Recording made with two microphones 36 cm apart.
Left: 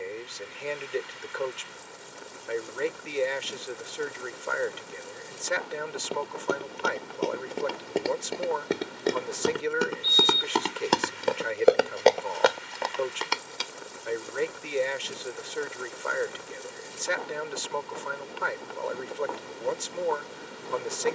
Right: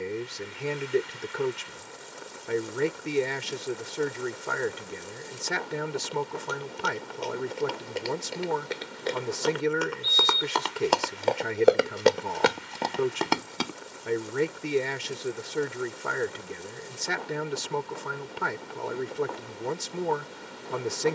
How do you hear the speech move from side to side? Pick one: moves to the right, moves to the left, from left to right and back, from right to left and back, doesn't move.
doesn't move.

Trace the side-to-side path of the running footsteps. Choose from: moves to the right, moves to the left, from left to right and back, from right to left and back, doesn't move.
moves to the right.